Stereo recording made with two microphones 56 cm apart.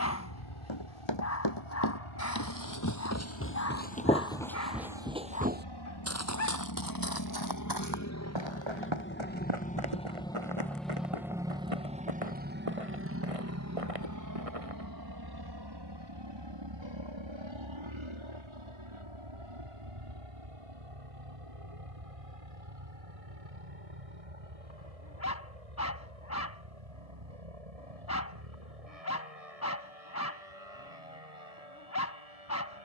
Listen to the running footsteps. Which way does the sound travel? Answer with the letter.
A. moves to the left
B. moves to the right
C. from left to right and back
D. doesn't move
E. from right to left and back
B.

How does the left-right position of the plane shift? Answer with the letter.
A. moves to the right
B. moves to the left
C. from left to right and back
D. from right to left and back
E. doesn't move
A.